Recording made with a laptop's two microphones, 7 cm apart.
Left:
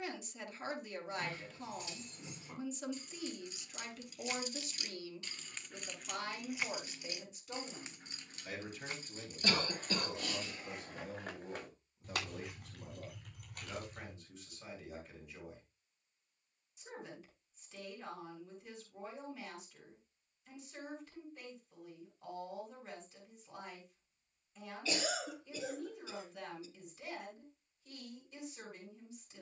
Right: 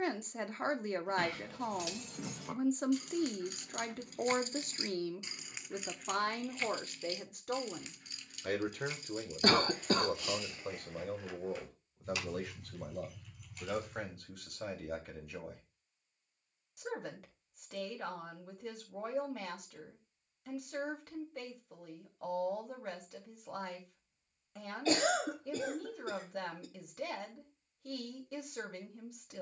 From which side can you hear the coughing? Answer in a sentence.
In this clip you hear the coughing on the right.